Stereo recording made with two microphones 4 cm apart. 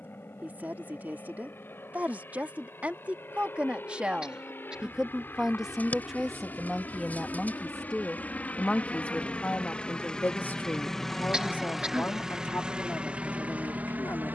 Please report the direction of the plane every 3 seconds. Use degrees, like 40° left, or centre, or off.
60° left, 60° left, 40° left, 10° left, 30° right.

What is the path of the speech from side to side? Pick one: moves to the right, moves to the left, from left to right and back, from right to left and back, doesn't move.
moves to the left.